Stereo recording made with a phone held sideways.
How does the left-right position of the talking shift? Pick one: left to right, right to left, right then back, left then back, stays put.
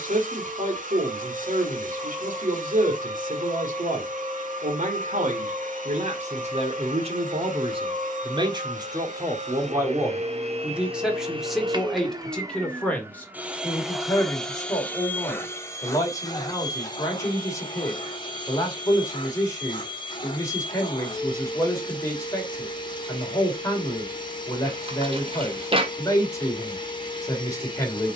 right to left.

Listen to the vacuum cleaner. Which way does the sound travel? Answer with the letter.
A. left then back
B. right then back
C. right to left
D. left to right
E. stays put
C.